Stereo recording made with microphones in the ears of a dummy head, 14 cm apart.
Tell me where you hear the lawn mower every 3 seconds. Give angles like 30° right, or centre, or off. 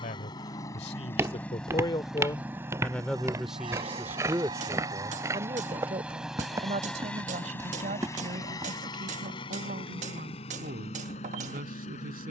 10° left, 30° right, 10° left, 40° left.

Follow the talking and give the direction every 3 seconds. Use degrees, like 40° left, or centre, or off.
30° left, 20° right, 50° right, 60° right.